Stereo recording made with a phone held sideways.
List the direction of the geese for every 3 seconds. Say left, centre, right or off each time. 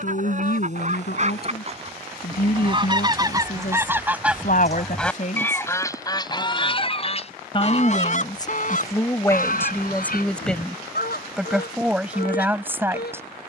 right, centre, left, left, left.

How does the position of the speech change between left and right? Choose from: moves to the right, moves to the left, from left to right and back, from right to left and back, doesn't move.
moves to the right.